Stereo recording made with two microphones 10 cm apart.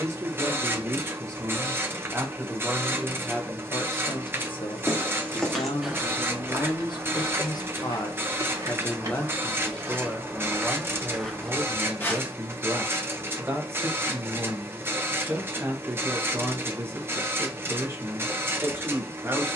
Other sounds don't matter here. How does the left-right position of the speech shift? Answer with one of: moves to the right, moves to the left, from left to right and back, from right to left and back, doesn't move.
from right to left and back.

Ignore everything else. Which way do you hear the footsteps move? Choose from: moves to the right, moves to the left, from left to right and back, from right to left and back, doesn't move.
from left to right and back.